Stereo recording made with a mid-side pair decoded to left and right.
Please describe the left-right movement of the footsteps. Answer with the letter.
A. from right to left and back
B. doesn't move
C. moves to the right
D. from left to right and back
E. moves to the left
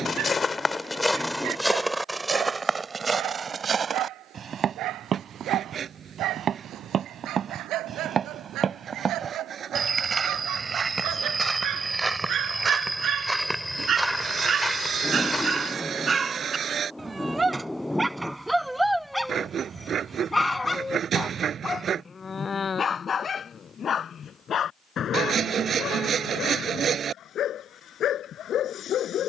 D.